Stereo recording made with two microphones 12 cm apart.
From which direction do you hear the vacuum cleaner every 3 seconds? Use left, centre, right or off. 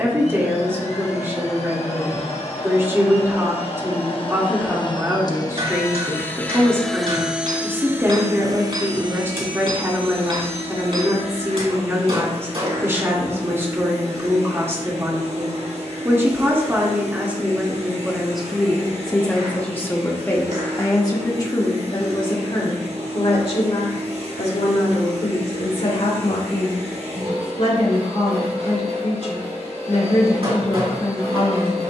left, left, centre, right, right, right, right, right, right, right, right.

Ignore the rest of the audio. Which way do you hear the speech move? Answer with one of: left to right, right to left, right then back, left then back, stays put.
right to left.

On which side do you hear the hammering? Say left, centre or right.
right.